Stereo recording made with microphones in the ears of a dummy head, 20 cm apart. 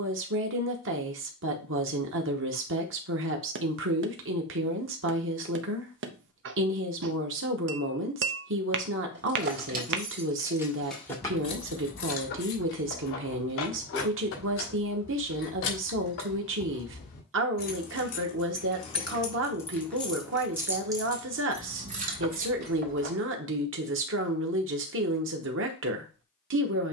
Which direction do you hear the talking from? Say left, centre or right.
right.